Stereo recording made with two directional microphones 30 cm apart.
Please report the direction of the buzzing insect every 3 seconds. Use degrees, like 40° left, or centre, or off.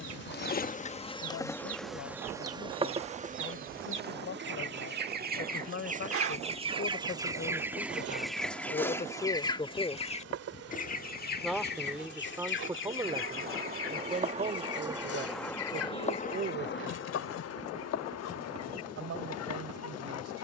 10° left, 40° right, 60° right, 60° right, 30° right, 30° left, 60° left.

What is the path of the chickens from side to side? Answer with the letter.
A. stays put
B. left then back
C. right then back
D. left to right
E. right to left
E.